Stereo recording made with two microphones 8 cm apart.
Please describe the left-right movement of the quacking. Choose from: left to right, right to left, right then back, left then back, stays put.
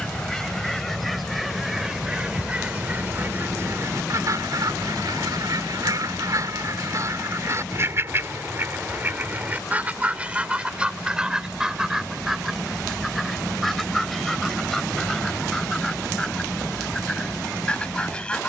right then back.